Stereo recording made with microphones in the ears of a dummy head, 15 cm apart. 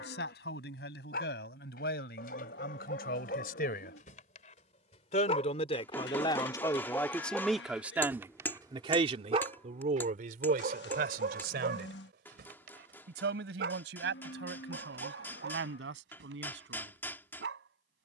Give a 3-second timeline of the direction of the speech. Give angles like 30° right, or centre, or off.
70° left, 50° left, centre, 50° right, 70° right, 80° right.